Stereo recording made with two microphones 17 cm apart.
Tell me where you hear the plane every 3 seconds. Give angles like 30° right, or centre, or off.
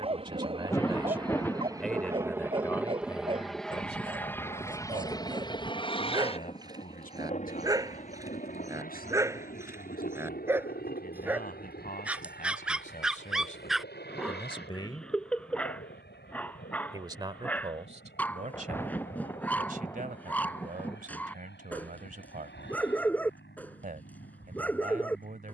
20° right, 10° left, 40° left, 60° left, 70° left, 70° left, 80° left, 80° left, 80° left.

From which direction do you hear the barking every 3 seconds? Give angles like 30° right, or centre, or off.
30° right, 30° right, 20° right, 10° right, centre, 10° left, 10° left, 10° left, 10° left.